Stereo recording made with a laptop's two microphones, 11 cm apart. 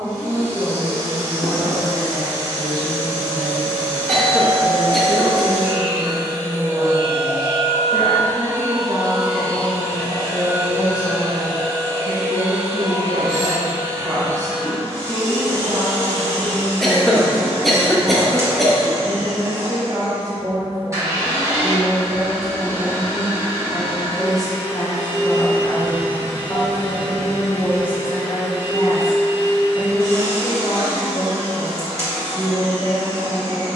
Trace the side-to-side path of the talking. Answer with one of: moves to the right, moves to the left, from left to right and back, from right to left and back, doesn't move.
moves to the left.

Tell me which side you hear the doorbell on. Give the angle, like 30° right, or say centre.
10° left.